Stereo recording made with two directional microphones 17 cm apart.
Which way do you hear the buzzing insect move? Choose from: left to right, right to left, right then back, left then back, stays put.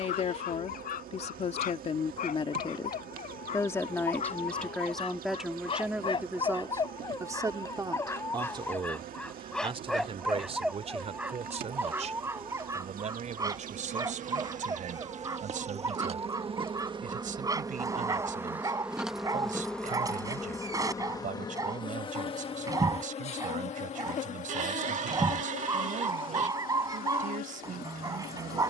right to left.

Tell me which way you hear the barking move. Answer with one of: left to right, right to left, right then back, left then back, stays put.
left to right.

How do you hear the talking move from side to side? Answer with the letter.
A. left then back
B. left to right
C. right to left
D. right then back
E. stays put
B.